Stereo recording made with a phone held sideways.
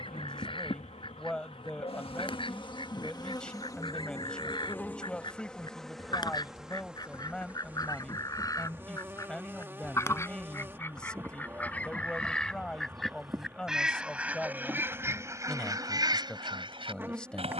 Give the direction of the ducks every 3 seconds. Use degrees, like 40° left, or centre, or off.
40° left, 40° left, 30° left, 20° left, centre, 30° right.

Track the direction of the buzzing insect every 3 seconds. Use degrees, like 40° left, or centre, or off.
50° left, 20° left, 10° right, 20° right, 20° right, 20° right.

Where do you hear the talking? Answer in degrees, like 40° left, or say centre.
10° left.